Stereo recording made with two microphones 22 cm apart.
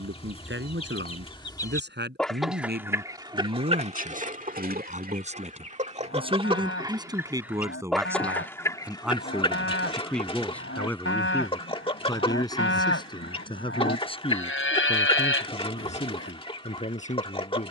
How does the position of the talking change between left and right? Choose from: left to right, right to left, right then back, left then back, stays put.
right to left.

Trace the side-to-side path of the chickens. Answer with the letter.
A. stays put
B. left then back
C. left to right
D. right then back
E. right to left
D.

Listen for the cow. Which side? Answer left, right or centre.
left.